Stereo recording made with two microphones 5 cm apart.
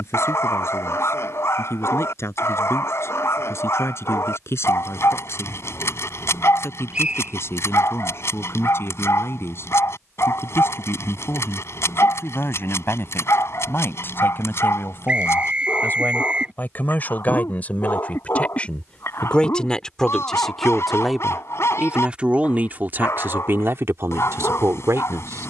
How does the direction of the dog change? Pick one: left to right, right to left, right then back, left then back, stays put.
stays put.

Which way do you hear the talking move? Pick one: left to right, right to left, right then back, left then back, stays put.
left to right.